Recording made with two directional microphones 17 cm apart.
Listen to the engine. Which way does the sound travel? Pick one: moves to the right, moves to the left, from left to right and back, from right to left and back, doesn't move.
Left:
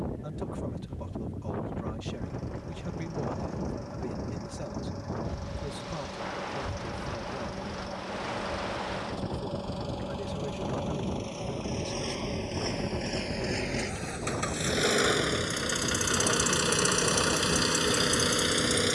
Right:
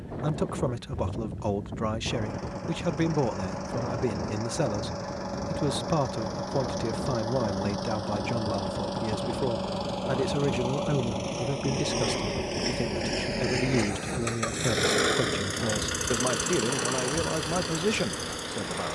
moves to the left.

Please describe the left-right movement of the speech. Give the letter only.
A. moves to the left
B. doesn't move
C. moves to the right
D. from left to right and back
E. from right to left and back
B.